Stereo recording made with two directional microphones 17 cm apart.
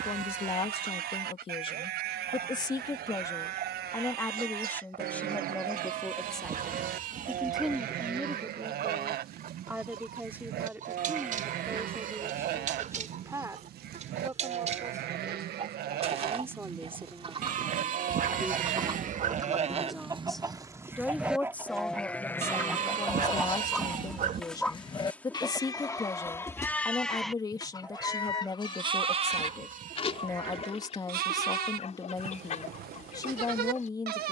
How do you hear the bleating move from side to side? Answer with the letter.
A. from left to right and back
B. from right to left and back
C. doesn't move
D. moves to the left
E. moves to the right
B.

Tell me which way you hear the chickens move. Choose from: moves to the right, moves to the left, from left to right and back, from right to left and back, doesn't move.
moves to the left.